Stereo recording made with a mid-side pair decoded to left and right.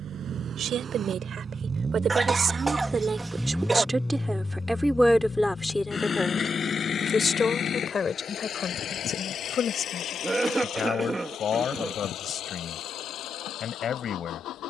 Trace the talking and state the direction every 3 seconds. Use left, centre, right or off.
right, centre, left, left, left.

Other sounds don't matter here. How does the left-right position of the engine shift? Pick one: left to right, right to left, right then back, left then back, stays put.
right to left.